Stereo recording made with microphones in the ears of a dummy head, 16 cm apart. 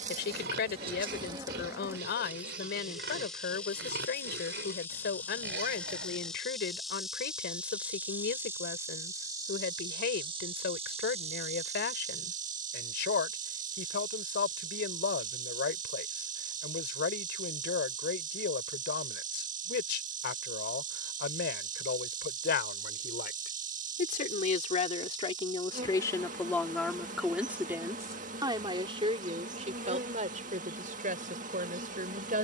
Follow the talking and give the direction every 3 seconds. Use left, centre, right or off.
left, left, left, left, left, left, left, left, left, right, right.